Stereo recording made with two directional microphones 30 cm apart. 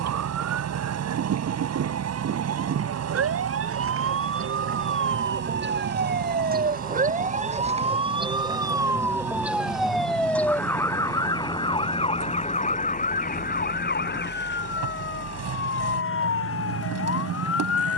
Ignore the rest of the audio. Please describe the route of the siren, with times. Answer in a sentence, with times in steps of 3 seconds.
You can hear the siren on the right from 0 s, in the centre from 9 s and on the left from 12 s.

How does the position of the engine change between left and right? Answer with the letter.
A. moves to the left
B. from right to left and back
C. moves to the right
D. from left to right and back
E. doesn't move
E.